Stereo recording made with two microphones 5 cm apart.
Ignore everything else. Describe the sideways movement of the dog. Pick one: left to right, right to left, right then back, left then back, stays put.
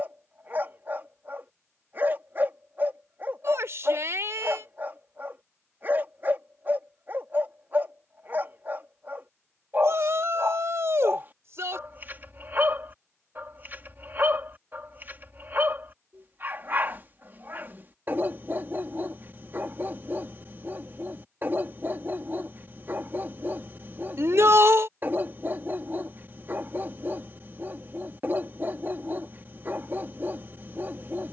stays put.